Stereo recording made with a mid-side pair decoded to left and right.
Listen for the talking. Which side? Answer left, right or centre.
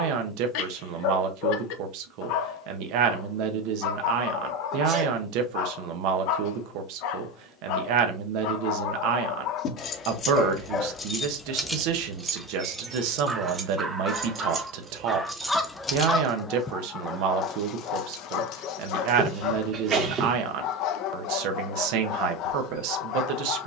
right.